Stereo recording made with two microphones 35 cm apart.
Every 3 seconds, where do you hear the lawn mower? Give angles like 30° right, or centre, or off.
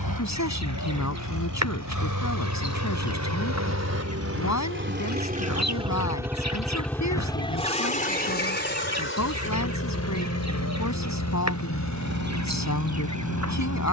60° right, 40° right, 10° left, 50° left, 60° left.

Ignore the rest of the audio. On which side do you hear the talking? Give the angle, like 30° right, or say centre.
50° left.